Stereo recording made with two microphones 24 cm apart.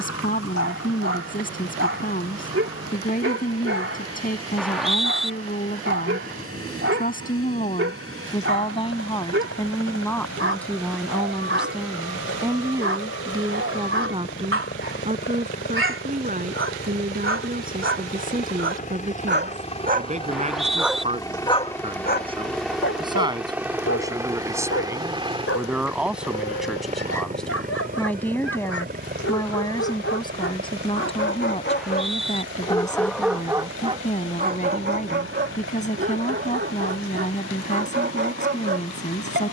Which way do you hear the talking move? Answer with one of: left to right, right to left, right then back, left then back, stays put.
right then back.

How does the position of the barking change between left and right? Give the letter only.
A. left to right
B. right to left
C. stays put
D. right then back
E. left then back
E.